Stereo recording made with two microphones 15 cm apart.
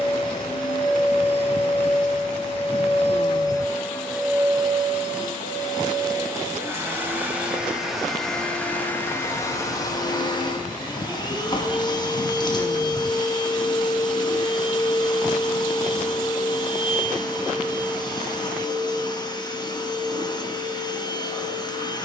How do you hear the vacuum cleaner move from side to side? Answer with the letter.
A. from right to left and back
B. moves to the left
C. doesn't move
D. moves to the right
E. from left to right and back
E.